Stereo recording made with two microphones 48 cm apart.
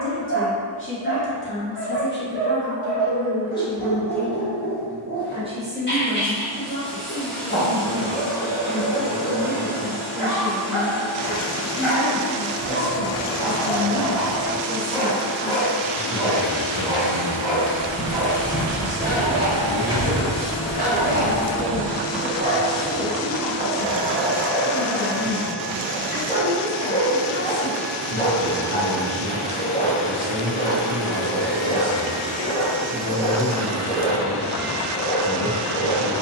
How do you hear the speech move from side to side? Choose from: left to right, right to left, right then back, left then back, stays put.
left to right.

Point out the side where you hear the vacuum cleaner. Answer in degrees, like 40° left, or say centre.
centre.